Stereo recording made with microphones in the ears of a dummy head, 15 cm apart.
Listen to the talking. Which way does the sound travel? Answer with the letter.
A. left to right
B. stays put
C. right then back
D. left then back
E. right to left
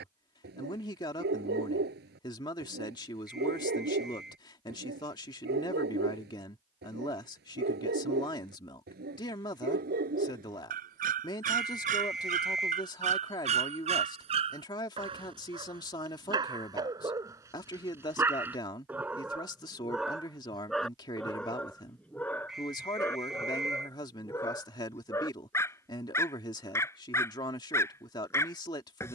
B.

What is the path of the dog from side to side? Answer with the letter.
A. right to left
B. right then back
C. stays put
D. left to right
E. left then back
A.